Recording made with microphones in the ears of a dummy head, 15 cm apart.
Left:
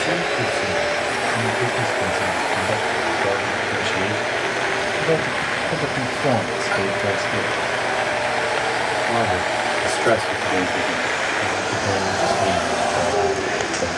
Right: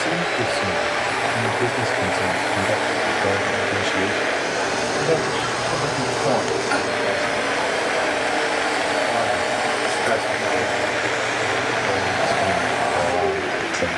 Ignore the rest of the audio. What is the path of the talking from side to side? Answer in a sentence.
In this clip you hear the talking move from right to left and back again.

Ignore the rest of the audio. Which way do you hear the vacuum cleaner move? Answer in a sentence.
You can hear the vacuum cleaner move from left to right and back again.